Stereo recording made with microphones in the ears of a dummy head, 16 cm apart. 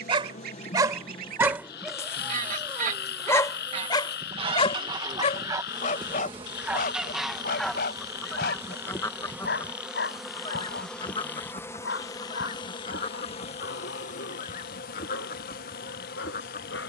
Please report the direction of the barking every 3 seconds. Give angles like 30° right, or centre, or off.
10° right, 30° left, 50° left, 70° left, 70° left, 80° left.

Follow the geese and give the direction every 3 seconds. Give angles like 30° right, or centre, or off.
50° right, 30° right, centre, 30° left, 40° left, 50° left.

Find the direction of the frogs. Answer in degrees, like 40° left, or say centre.
60° left.